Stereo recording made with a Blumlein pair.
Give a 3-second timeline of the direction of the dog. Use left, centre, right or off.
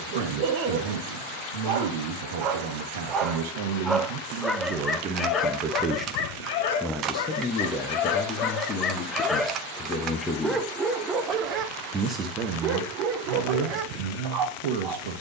right, centre, left, centre, right.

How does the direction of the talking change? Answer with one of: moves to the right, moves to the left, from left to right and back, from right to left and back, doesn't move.
from right to left and back.